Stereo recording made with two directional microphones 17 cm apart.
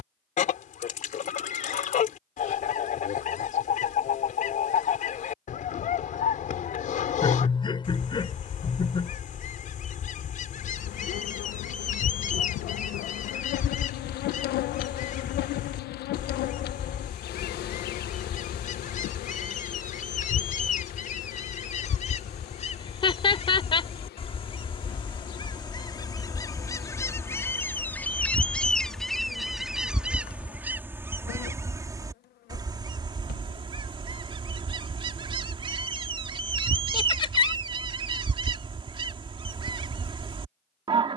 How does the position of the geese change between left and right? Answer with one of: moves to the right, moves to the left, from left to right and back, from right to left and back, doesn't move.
moves to the right.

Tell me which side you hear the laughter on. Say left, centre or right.
left.